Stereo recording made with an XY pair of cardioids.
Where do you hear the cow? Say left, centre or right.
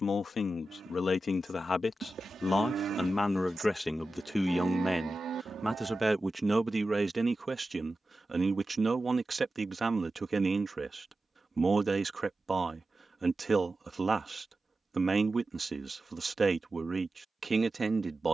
right.